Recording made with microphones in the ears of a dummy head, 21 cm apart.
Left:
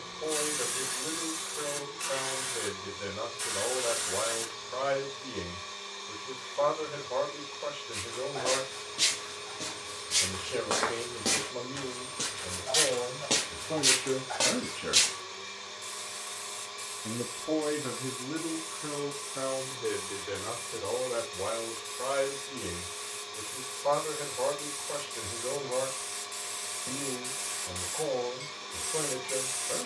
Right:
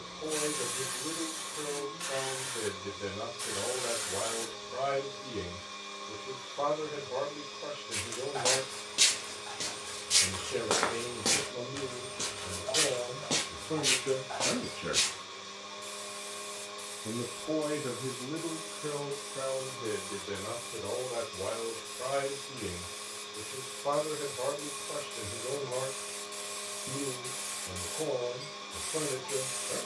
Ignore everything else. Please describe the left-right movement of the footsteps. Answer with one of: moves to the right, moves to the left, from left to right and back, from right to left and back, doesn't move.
moves to the left.